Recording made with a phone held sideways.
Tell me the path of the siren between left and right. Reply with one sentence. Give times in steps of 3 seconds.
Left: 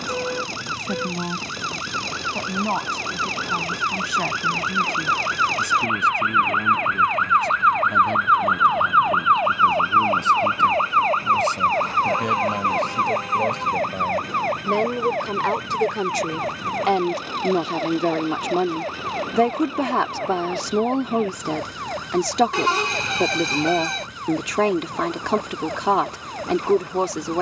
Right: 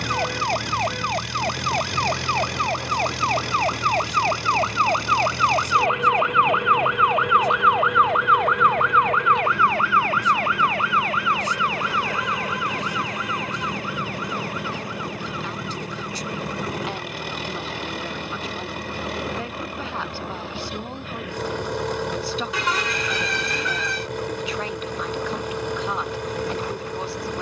In this clip you hear the siren on the right from 0 s, in the centre from 6 s and on the left from 9 s.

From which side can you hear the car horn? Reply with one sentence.
In this clip you hear the car horn on the left.